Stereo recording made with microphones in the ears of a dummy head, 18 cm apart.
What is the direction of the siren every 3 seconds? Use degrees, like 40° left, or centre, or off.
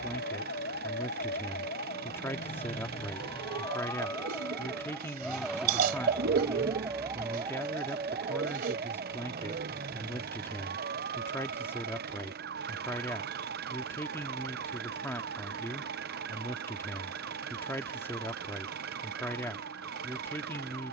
40° left, 10° left, 20° right, 40° right, 50° right, 60° right, 60° right.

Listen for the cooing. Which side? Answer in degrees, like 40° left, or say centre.
50° right.